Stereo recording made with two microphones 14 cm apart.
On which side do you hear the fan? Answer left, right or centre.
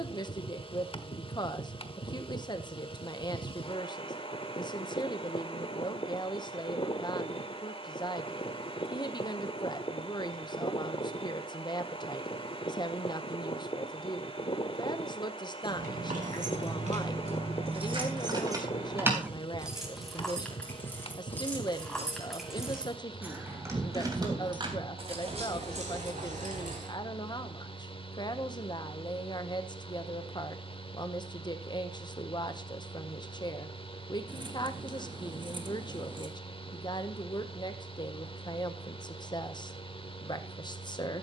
left.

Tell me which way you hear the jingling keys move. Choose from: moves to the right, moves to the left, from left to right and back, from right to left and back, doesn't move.
from right to left and back.